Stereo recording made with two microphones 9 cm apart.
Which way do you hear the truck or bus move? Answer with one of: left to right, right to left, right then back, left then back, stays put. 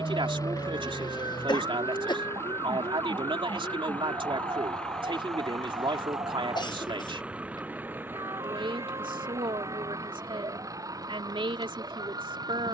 left to right.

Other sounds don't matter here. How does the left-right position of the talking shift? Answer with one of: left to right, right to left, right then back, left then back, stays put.
stays put.